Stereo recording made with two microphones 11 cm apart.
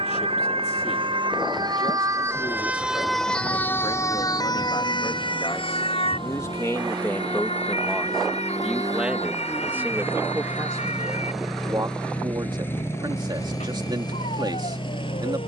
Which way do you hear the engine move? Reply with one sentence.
You can hear the engine move to the left.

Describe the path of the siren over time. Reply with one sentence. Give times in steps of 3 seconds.
In this clip you hear the siren on the right from 0 s and on the left from 3 s.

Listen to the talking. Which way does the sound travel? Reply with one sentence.
In this clip you hear the talking travel towards the right.